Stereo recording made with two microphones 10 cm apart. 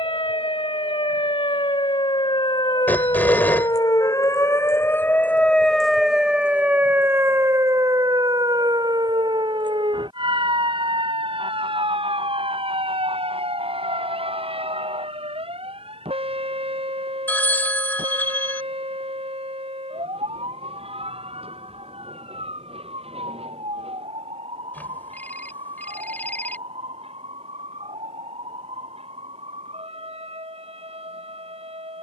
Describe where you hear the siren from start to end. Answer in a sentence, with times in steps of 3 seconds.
You can hear the siren on the left from 0 s and on the right from 6 s.